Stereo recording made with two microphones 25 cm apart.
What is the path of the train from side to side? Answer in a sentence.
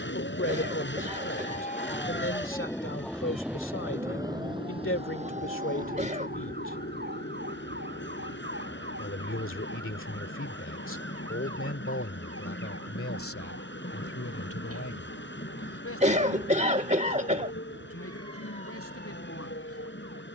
In this clip you hear the train stay put.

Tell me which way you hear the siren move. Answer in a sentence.
You can hear the siren travel towards the right.